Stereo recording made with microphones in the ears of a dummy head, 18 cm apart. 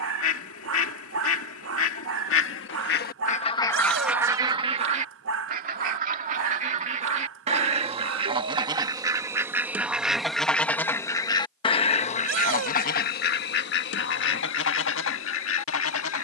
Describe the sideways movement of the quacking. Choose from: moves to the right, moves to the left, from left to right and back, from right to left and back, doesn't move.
from left to right and back.